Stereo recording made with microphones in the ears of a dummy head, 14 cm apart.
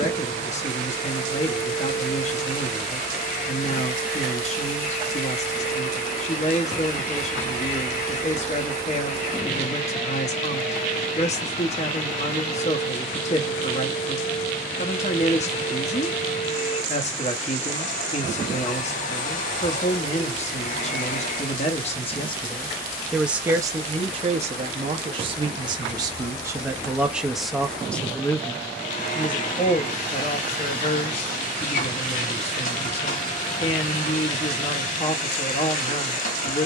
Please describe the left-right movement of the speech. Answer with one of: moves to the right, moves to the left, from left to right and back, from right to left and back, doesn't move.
from left to right and back.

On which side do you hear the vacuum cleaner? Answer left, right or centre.
left.